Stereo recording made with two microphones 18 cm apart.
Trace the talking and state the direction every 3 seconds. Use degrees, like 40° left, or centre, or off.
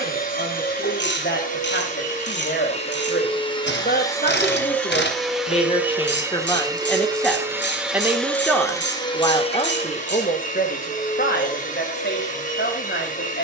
70° left, 50° left, 10° left, 50° left, 70° left.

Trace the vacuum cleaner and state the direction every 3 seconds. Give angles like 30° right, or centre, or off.
50° left, 10° left, 10° right, 40° left, 50° left.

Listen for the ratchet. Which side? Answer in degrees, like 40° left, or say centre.
70° left.